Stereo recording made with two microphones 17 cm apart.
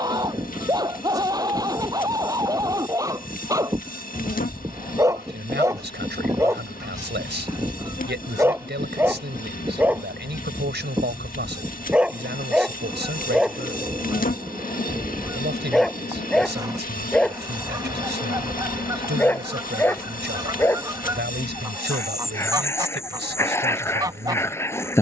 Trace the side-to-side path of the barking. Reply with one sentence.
In this clip you hear the barking go from the right side to the left.